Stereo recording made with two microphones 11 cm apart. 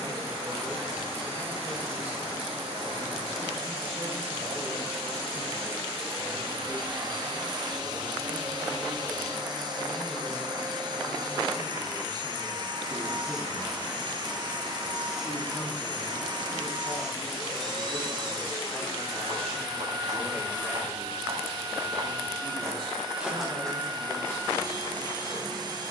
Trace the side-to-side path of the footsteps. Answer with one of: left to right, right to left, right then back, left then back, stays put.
right to left.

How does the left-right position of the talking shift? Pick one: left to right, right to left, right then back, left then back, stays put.
left then back.